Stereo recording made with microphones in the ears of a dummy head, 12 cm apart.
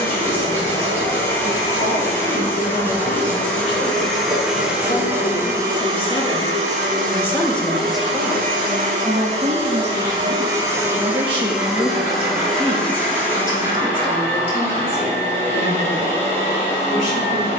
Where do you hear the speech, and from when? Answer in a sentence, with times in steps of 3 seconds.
You can hear the speech on the left from 0 s, in the centre from 6 s, on the right from 9 s and on the left from 12 s.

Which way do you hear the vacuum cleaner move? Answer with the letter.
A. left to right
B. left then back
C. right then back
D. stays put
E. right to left
C.